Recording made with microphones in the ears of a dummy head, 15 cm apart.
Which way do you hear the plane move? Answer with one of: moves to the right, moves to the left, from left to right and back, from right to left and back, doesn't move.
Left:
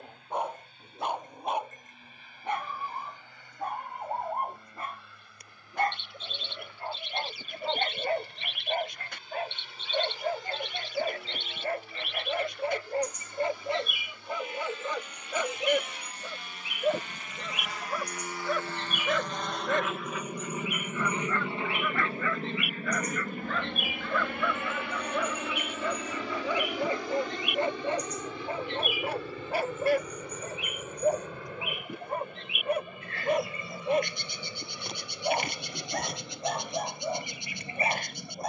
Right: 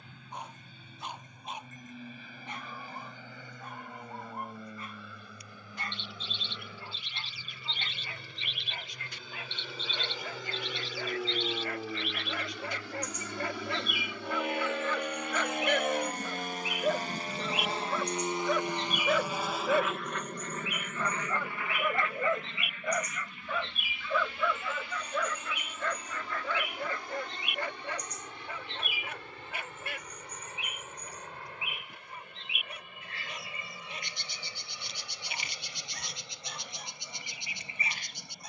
moves to the left.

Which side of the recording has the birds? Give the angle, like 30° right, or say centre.
40° left.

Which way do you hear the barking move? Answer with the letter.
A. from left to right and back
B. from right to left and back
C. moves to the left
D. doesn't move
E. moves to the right
A.